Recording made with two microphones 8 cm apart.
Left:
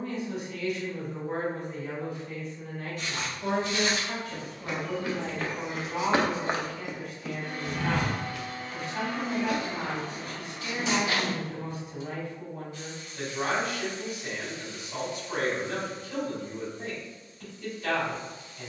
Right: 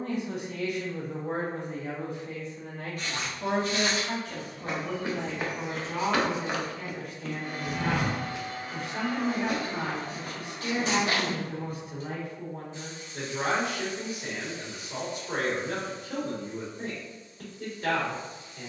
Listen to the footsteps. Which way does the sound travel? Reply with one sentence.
In this clip you hear the footsteps move from right to left and back again.